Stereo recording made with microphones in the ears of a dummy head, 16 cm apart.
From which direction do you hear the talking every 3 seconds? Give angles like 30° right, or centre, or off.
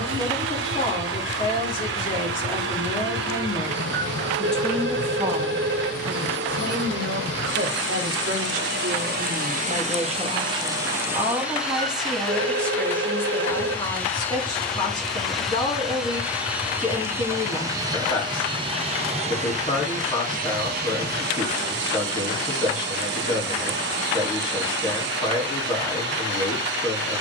30° left, centre, 60° right, 30° right, 10° left, 20° left, 20° left, 20° left, 20° left.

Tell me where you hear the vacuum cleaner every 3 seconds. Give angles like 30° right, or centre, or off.
70° right, 70° right, 70° right, 30° right, 10° left, 10° right, 40° right, 60° right, 70° right.